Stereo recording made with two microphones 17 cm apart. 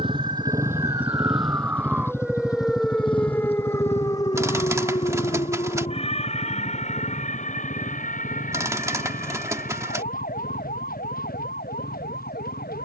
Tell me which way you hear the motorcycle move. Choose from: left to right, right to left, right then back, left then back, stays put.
right to left.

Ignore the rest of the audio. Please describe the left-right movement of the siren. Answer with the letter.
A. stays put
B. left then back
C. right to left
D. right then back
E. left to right
C.